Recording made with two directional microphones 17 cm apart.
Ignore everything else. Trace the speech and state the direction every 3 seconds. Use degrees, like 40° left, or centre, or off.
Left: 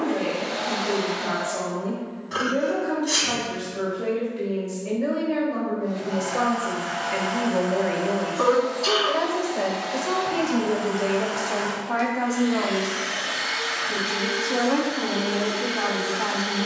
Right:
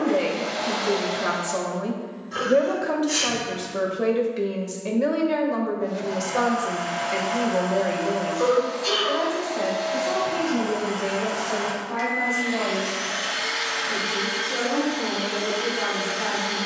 60° right, 50° right, 10° right, 30° left, 40° left, 40° left.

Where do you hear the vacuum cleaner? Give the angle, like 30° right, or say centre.
10° right.